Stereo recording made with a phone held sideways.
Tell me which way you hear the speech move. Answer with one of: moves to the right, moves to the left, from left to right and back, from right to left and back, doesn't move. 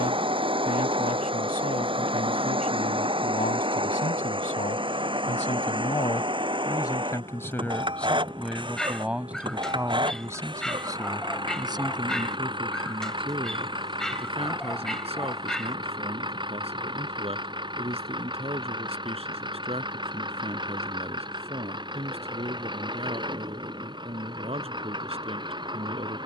moves to the right.